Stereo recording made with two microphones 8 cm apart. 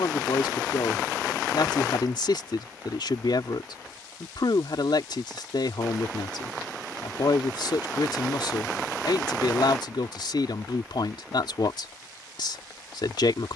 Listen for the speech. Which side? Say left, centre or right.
left.